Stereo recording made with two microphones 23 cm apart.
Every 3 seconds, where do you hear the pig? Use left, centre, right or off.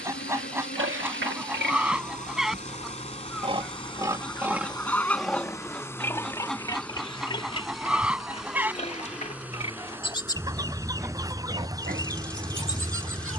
right, centre, left, centre, right.